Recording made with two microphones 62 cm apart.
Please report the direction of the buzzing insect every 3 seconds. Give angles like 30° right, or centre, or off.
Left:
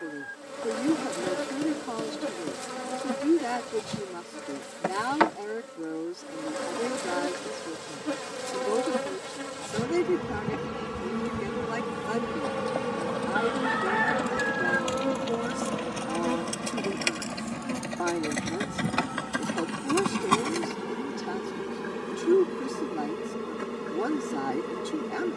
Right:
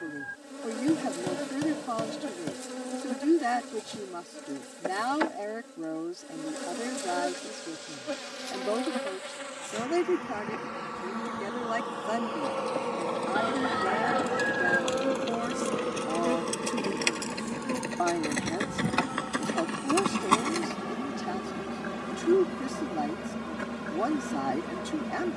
80° left, 80° left, 70° left, 60° left, 40° left, 20° left, centre, 10° right, 20° right.